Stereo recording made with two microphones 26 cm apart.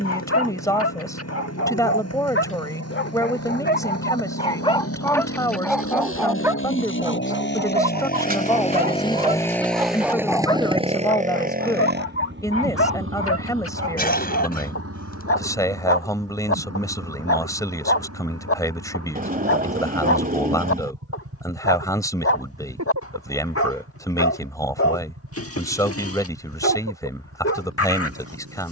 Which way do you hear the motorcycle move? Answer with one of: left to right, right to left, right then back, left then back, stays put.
left to right.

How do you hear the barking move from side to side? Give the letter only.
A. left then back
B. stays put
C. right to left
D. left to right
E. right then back
E.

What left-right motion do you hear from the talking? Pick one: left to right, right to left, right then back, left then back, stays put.
stays put.